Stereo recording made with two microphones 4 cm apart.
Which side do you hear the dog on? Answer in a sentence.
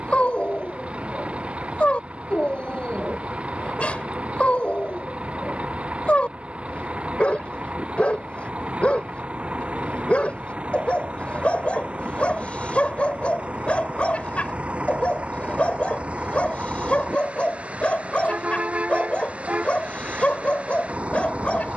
You can hear the dog on the left.